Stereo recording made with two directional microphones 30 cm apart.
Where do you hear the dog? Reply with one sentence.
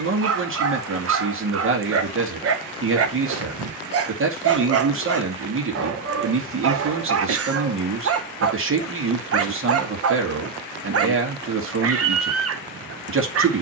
In this clip you hear the dog on the right.